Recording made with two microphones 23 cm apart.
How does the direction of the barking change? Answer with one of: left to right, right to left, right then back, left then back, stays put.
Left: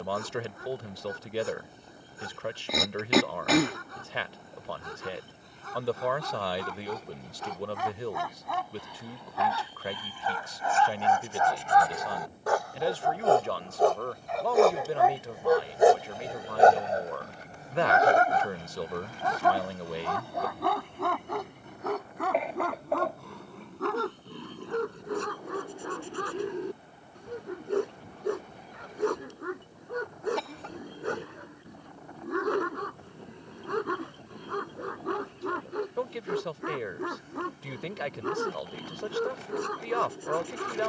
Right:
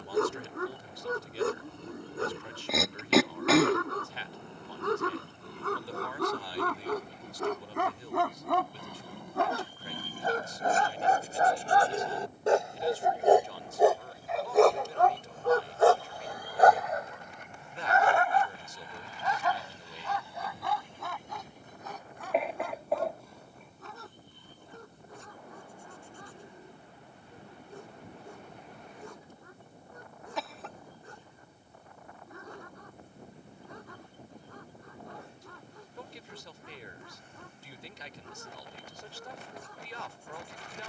right to left.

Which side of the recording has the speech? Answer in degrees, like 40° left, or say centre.
70° left.